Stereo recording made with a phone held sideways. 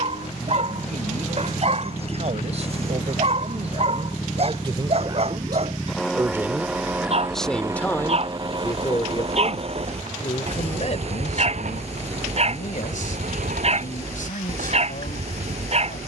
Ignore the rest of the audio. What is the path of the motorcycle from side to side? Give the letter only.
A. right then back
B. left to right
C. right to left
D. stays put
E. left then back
B.